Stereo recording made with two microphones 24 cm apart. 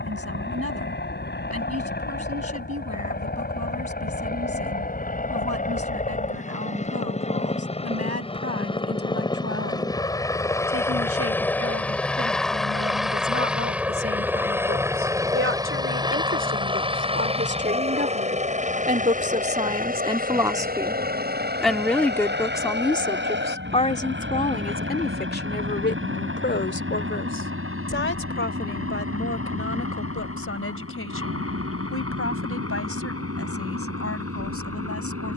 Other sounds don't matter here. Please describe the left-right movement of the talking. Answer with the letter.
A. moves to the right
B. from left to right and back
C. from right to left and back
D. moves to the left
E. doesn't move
D.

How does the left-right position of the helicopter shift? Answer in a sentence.
You can hear the helicopter move to the right.